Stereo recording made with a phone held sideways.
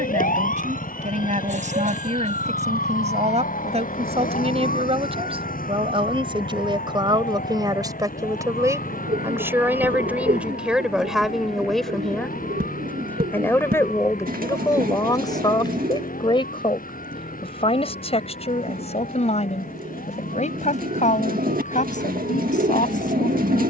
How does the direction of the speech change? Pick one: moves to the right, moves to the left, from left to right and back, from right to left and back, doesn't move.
moves to the left.